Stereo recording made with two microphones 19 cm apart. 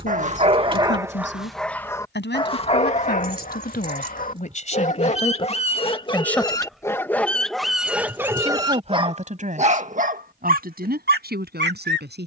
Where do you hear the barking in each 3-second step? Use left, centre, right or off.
centre, left, centre, right.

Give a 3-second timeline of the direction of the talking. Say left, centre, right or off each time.
left, left, centre, right.